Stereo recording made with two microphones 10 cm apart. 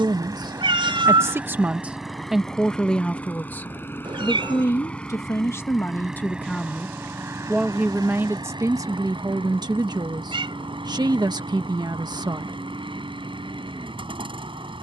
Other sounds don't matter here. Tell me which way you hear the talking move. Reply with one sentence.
You can hear the talking go left and come back.